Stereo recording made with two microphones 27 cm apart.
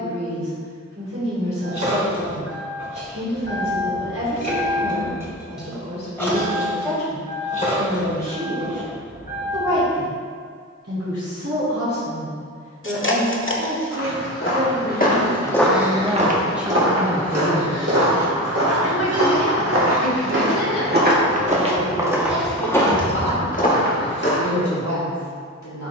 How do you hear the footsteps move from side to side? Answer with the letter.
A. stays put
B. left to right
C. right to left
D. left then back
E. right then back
E.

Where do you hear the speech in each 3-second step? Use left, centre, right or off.
right, right, right, right, right, centre, left, left, left.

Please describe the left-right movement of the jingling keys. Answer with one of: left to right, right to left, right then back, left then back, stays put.
right to left.